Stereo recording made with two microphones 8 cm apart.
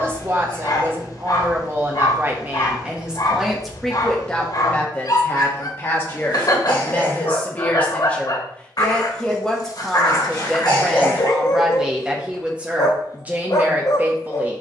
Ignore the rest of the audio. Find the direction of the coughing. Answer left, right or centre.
left.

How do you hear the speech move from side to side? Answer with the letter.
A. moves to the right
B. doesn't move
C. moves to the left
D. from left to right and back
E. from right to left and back
E.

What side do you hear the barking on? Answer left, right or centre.
left.